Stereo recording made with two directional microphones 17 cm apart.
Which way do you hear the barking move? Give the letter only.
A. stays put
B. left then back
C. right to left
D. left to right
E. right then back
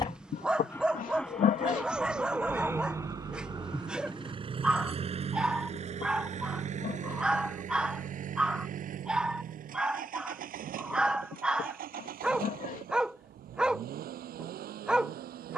A.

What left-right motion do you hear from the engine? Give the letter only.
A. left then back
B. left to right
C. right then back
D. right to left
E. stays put
B.